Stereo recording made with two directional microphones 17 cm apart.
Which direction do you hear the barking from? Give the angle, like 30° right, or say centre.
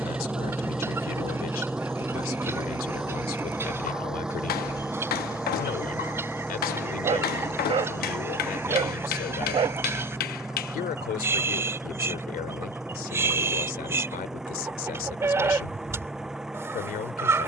30° right.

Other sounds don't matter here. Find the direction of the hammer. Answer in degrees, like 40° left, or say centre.
60° left.